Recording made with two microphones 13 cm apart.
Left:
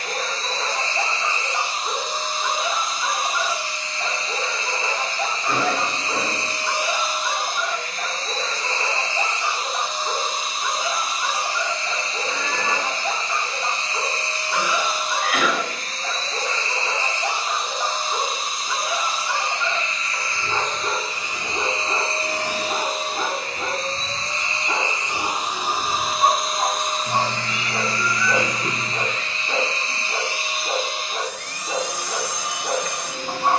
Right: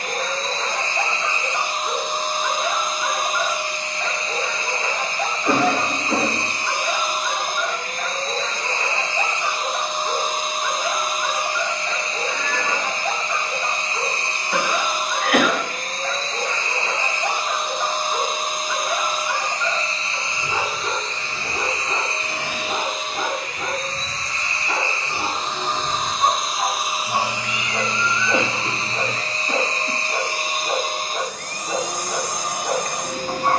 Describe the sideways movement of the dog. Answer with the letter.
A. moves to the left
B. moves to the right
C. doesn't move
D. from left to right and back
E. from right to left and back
C.